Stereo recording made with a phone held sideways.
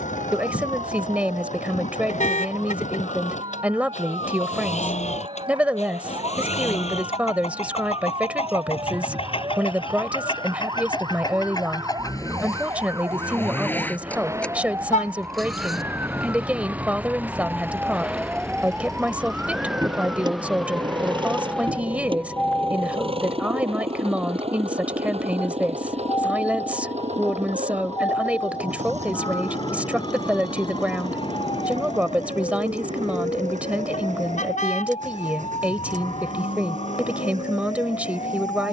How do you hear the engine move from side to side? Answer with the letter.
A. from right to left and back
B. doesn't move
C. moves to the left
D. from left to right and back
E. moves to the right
E.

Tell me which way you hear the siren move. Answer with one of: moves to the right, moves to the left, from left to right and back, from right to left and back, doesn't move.
moves to the left.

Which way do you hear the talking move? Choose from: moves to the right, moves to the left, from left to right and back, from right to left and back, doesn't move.
doesn't move.